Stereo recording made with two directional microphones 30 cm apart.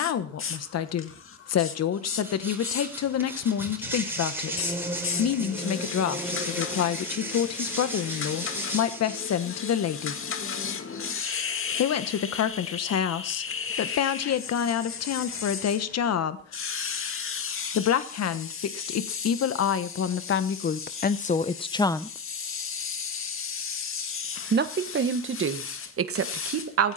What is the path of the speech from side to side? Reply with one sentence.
In this clip you hear the speech go from the left side to the right.